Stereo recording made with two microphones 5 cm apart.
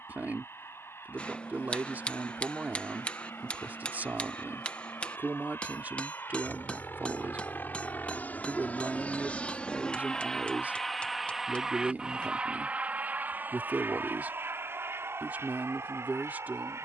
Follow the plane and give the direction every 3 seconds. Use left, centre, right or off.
left, left, left, centre, right, right.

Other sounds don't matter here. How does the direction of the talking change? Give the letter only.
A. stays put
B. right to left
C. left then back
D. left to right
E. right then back
A.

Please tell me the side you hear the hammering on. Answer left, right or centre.
left.